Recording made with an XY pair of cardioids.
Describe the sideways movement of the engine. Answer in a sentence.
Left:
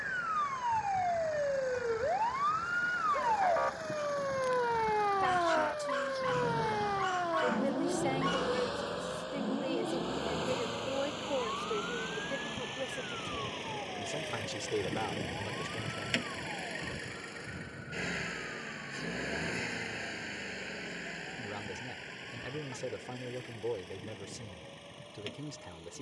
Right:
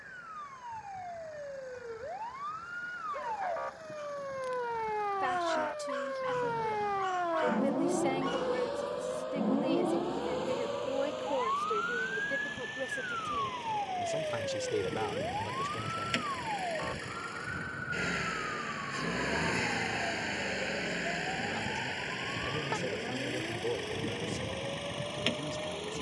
You can hear the engine move from left to right.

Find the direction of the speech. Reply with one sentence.
In this clip you hear the speech in the centre.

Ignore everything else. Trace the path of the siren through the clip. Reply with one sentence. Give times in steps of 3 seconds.
In this clip you hear the siren on the left from 0 s, in the centre from 6 s and on the right from 9 s.